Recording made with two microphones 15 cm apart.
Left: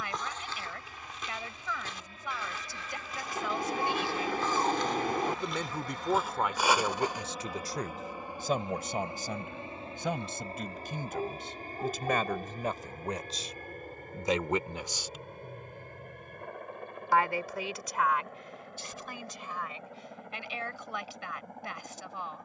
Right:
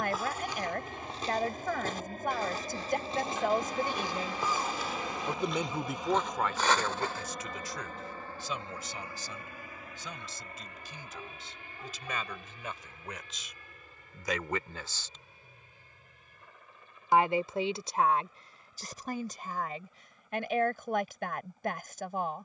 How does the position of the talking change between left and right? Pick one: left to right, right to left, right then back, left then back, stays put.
left then back.